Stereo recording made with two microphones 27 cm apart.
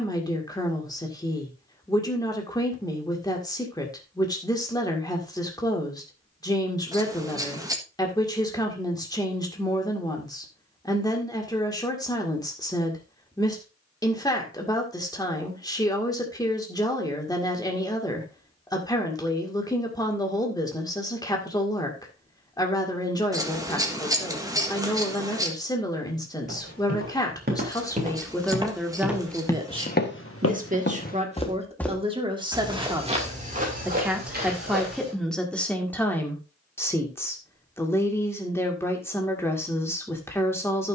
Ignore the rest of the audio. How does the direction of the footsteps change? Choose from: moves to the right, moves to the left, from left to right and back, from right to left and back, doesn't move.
from right to left and back.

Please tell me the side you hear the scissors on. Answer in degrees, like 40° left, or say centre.
10° right.